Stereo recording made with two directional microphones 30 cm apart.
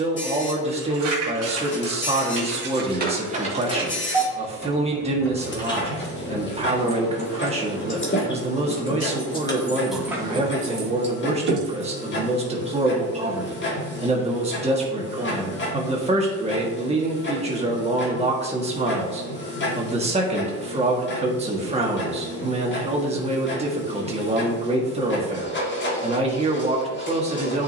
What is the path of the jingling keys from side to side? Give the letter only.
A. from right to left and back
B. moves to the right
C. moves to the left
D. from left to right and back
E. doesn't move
A.